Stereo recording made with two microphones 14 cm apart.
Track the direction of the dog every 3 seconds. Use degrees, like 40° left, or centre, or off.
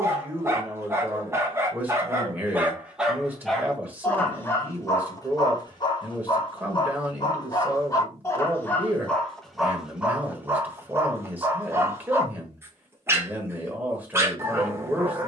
20° right, 20° left, 30° left, 10° right, 20° right.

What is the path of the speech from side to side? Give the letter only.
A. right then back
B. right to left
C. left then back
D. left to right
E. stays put
E.